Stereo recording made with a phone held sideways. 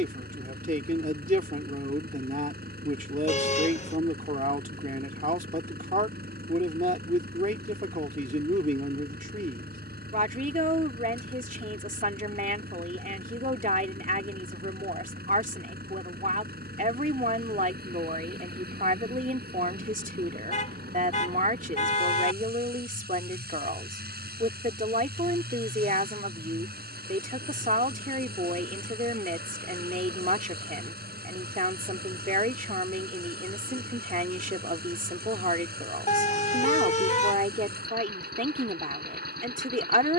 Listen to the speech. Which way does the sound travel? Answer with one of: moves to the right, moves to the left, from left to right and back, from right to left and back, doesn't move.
doesn't move.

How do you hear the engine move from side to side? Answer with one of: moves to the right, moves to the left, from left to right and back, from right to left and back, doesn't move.
doesn't move.